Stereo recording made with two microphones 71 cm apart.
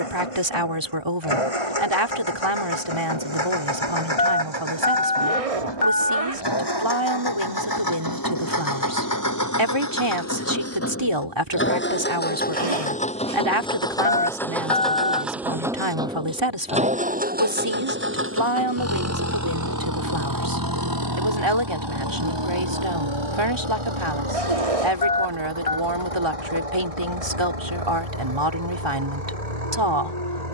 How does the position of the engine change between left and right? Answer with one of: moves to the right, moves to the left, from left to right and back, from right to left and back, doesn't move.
moves to the right.